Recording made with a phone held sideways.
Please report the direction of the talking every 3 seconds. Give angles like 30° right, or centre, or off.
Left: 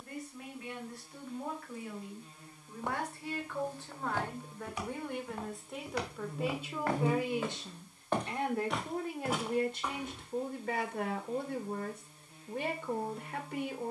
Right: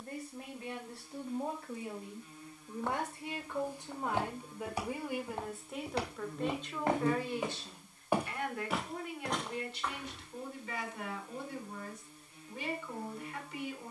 30° right, 10° right, 20° left, 50° left, 50° left.